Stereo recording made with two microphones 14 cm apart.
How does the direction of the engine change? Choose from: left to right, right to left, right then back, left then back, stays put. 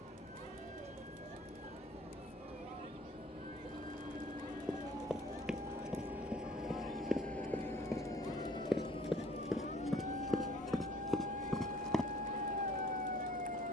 right to left.